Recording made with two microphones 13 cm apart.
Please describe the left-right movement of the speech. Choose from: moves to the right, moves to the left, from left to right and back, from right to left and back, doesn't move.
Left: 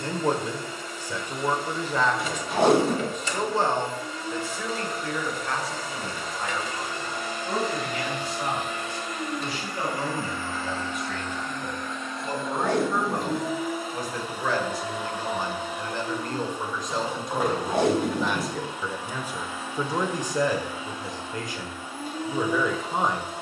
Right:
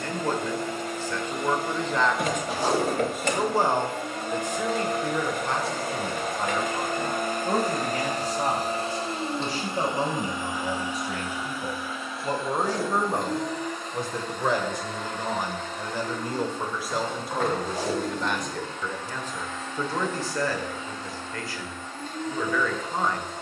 from left to right and back.